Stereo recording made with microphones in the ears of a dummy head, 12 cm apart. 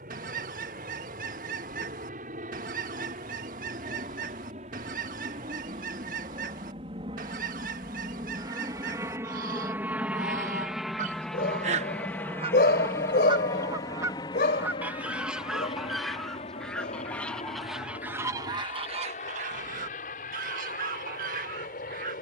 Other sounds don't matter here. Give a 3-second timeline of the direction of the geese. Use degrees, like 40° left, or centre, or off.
70° right, 70° right, 70° right, 60° right, 30° right, centre, 50° right, 70° right.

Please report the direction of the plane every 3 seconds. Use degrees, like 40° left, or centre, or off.
60° right, 50° right, 30° right, 10° right, 20° left, 40° left, 50° left, 60° left.